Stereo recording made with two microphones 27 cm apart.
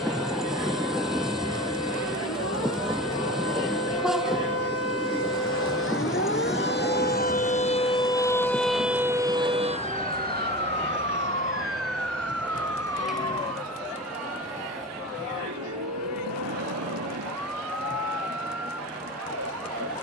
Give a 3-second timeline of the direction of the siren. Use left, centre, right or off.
left, left, left, right, right, right, right.